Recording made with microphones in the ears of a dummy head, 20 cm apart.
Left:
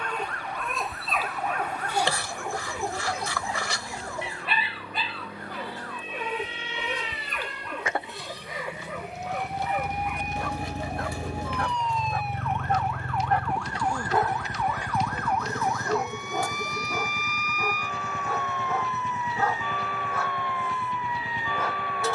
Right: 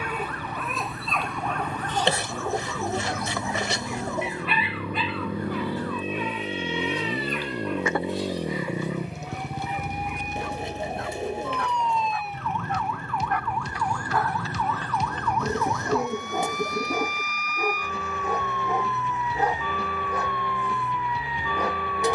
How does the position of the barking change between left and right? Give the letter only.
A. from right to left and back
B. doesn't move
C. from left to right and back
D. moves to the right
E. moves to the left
A.